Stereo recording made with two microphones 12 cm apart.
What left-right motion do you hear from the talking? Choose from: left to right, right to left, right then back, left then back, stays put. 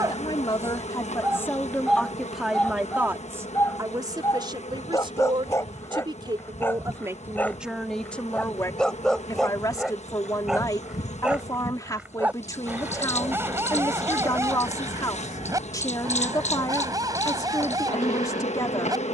right then back.